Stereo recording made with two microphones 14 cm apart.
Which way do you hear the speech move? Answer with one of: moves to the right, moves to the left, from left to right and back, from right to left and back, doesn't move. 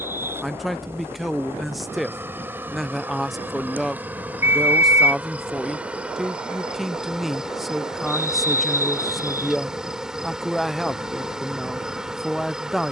doesn't move.